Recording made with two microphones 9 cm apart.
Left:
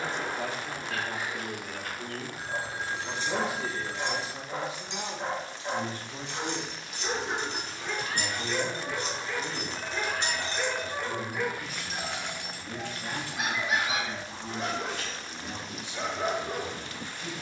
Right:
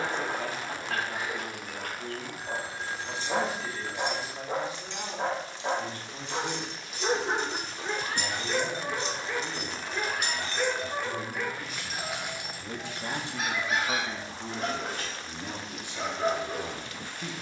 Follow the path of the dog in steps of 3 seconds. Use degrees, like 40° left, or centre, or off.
60° right, 60° right, 40° right, centre, 20° left, 20° left.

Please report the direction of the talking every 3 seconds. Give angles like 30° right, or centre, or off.
30° left, 30° left, 10° left, 10° right, 40° right, 50° right.